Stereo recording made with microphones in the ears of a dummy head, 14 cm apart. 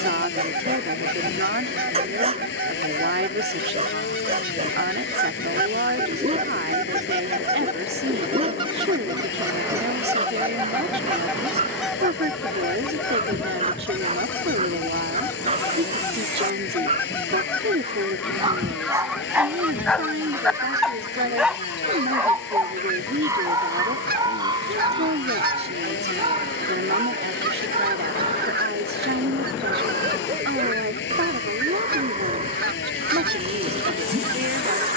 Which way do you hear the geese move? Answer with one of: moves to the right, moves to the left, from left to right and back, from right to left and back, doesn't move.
from right to left and back.